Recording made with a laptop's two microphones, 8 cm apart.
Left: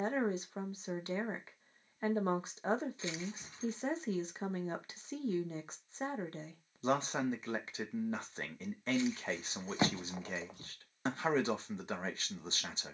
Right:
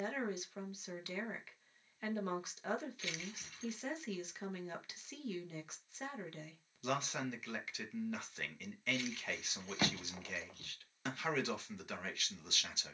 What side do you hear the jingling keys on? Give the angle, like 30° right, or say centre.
20° left.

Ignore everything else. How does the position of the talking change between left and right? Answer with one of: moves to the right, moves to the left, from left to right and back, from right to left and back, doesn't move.
doesn't move.